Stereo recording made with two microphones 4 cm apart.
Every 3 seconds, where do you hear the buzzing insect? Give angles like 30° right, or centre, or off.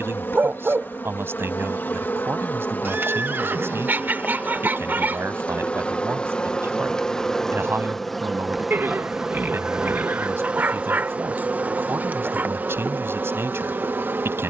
50° left, 30° left, 10° left, 30° right, 50° right.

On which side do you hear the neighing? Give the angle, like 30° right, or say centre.
50° right.